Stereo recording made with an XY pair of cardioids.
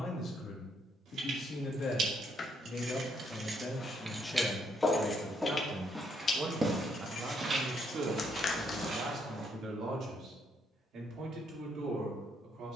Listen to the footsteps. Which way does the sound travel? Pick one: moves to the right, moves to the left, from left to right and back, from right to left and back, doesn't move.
moves to the right.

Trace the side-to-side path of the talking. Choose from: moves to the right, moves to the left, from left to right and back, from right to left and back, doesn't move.
moves to the right.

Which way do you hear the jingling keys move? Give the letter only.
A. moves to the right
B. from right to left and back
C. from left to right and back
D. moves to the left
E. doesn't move
D.